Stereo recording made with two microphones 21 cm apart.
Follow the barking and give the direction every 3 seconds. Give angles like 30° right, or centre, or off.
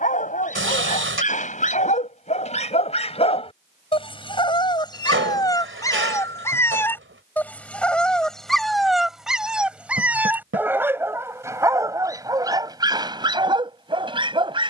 40° left, 20° left, 10° left, 10° right, 20° right.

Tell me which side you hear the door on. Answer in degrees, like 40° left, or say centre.
70° right.